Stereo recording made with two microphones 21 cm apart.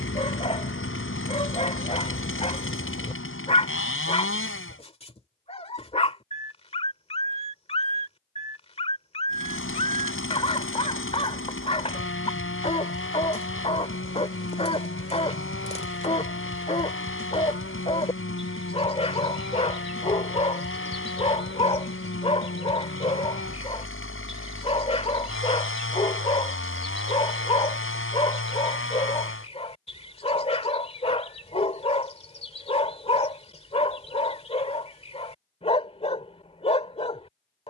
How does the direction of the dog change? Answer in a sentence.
In this clip you hear the dog stay in one place.